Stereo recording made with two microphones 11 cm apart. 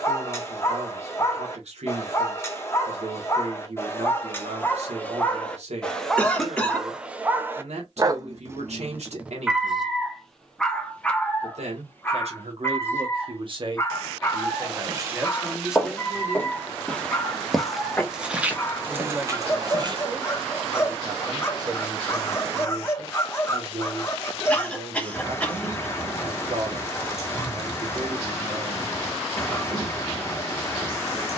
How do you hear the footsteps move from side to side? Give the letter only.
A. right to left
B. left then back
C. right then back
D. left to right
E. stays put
B.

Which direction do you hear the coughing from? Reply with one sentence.
In this clip you hear the coughing in the centre.